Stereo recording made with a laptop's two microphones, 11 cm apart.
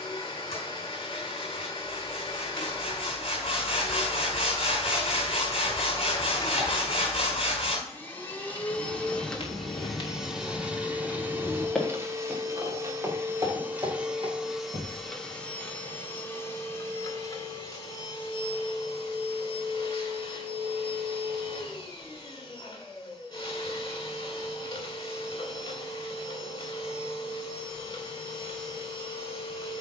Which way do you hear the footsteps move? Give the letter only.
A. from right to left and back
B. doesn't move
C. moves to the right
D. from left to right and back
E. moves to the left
C.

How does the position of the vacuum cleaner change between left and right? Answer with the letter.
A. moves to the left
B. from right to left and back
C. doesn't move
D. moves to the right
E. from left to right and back
E.